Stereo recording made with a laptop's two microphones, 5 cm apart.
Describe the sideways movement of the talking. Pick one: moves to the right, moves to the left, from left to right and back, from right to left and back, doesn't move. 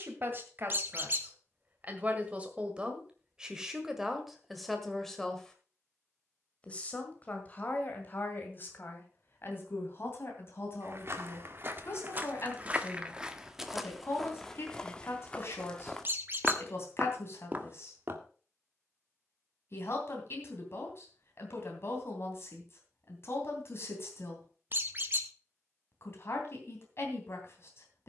moves to the left.